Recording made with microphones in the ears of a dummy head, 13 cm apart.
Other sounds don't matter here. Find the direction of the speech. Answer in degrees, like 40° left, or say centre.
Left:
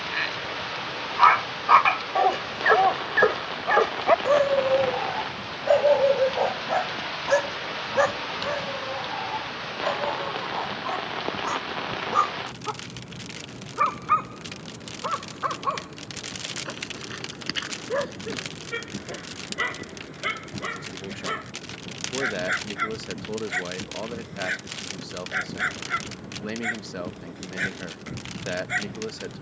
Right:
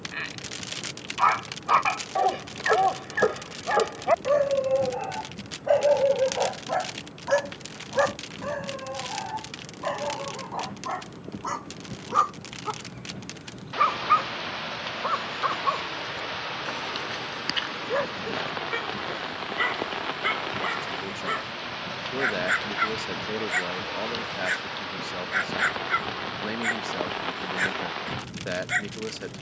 centre.